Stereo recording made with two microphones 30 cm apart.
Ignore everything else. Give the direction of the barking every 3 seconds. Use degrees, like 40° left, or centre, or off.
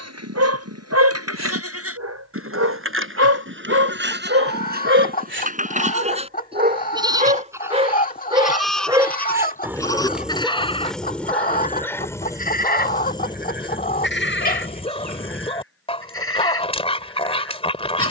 60° right, 40° right, 20° right, centre, 20° left, 20° left.